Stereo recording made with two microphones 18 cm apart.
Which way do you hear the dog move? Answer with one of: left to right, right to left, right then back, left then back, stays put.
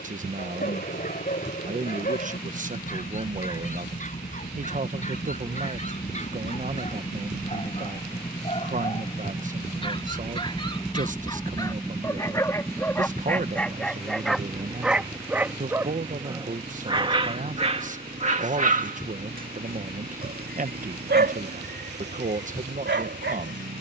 left to right.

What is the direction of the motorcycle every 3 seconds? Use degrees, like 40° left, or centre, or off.
60° left, 50° left, 30° left, 10° left, 10° right, 30° right, 50° right, 60° right.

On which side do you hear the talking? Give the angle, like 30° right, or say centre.
40° right.